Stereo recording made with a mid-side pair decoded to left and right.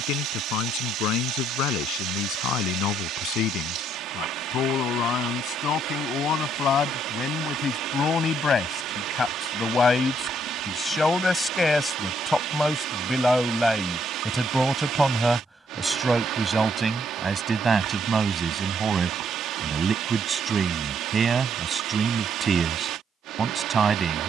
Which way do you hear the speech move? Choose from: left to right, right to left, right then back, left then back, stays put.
left to right.